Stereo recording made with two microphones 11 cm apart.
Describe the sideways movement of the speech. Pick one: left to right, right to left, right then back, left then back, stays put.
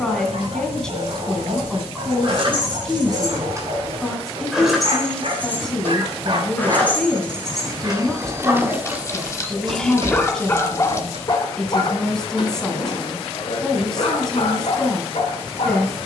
stays put.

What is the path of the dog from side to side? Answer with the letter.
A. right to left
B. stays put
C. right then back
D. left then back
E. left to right
A.